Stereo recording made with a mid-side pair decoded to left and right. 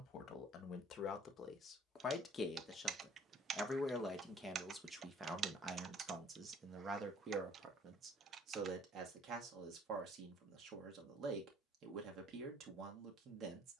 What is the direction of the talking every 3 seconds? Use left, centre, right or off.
left, centre, right, right, right.